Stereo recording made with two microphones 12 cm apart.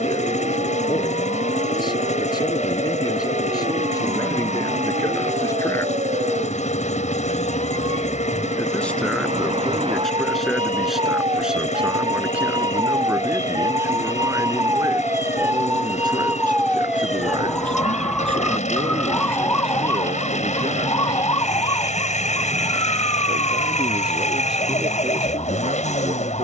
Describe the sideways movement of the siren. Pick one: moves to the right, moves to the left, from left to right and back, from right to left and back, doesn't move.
moves to the left.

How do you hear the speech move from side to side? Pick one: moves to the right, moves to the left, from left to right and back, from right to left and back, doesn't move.
moves to the right.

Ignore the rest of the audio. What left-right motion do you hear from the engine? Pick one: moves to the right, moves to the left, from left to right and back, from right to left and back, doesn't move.
doesn't move.